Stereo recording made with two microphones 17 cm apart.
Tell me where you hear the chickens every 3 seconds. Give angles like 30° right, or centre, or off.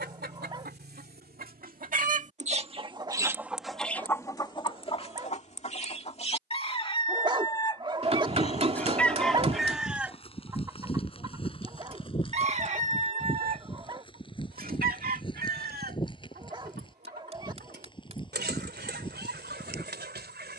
60° right, 20° left, 30° left, 10° right, 50° right, 70° right, 80° right.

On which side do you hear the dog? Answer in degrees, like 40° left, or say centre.
30° right.